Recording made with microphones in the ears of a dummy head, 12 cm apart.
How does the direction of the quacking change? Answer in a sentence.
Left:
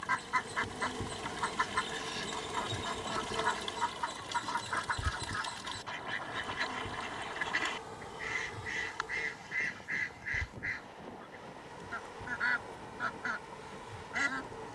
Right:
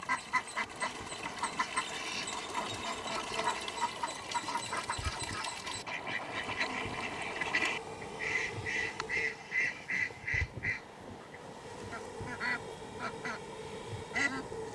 In this clip you hear the quacking stay in one place.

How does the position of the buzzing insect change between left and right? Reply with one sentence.
You can hear the buzzing insect travel towards the right.